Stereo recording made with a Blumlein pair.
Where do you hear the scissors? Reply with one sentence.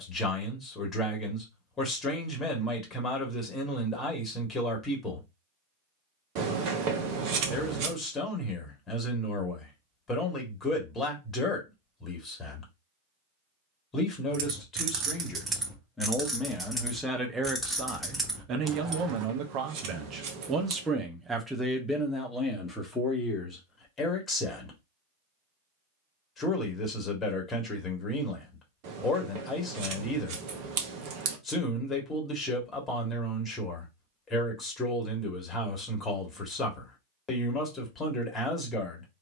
You can hear the scissors on the right.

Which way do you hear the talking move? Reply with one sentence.
In this clip you hear the talking go right and come back.